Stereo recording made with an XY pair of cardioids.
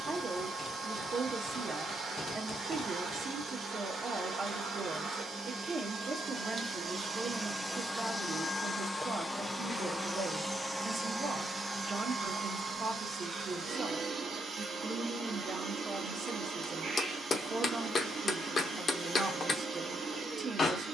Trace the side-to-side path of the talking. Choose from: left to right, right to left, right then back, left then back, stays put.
stays put.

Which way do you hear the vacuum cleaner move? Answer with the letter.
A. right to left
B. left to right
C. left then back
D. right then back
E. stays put
C.